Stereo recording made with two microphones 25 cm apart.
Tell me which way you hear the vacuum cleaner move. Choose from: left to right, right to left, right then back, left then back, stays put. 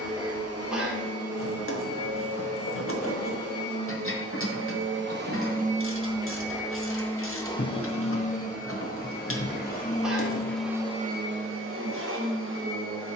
left then back.